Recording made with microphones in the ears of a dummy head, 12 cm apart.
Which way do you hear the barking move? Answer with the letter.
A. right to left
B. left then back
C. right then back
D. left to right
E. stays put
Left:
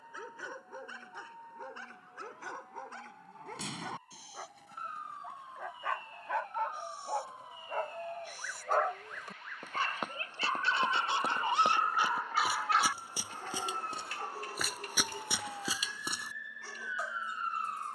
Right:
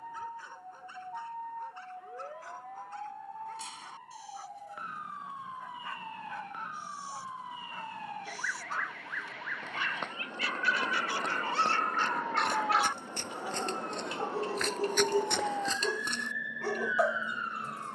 D.